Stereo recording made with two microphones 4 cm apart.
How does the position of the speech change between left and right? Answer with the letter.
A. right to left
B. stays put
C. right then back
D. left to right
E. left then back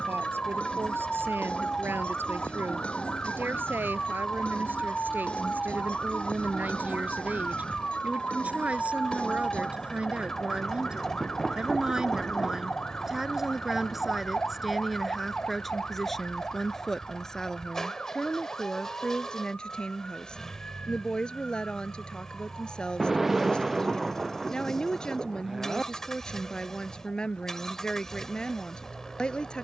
A.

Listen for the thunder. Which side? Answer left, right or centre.
centre.